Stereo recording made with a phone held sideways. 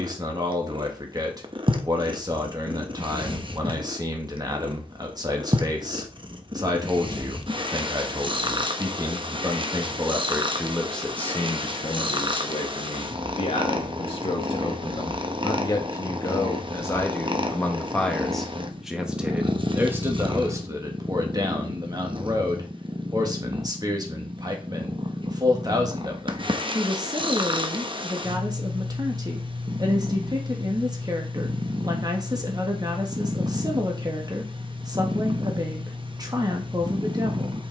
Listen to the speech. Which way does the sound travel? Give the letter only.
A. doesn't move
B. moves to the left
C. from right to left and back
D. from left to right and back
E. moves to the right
C.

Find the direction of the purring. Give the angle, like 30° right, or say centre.
40° right.